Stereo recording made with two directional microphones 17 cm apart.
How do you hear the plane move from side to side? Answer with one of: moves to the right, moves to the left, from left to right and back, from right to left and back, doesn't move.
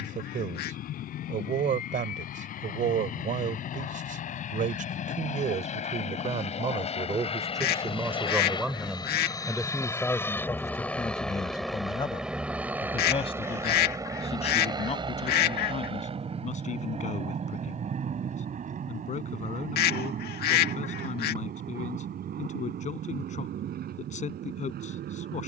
moves to the right.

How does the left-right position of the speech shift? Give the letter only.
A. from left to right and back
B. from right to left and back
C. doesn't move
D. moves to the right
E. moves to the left
E.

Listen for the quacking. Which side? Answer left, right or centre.
left.